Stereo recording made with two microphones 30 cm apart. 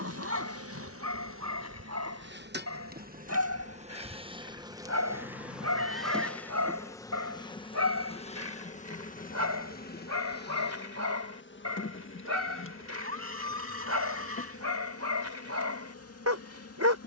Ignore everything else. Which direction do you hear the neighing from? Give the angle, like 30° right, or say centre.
50° right.